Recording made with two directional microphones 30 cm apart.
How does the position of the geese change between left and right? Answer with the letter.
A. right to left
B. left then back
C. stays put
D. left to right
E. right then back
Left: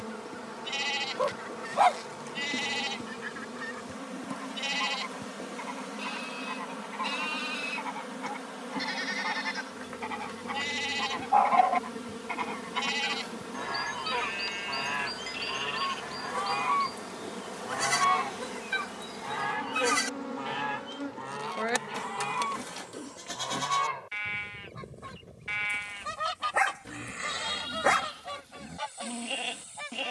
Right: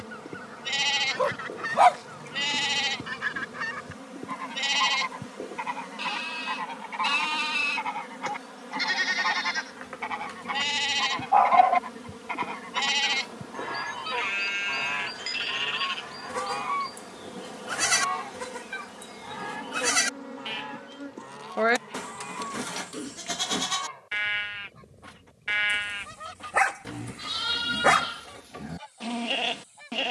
A.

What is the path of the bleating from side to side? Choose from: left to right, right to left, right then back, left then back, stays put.
stays put.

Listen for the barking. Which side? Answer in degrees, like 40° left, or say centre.
20° right.